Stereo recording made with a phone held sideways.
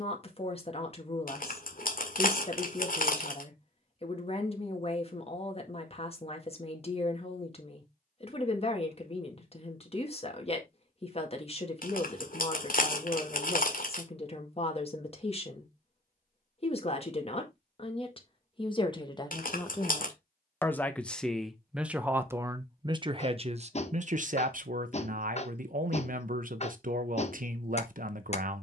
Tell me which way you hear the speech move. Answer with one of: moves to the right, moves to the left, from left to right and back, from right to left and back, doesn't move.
moves to the right.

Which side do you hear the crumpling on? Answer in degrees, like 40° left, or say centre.
60° left.